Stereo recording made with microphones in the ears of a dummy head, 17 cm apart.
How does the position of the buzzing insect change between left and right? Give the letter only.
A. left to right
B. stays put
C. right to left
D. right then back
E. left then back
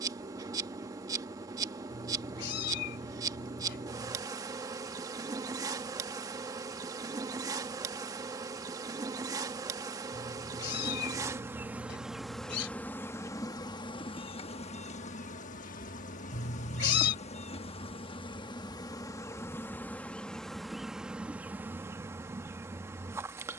E.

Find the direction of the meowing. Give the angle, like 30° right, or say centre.
60° left.